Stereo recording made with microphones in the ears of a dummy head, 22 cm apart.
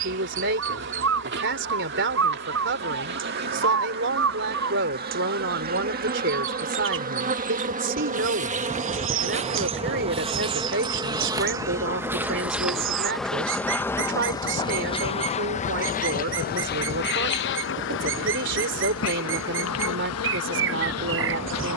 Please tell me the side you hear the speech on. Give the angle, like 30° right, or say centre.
50° right.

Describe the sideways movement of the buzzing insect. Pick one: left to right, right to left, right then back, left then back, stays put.
right to left.